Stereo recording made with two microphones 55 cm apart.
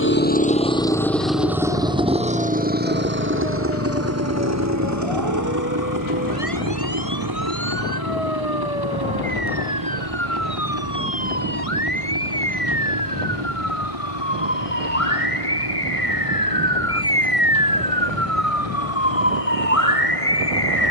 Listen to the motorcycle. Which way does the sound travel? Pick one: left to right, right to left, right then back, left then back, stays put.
left to right.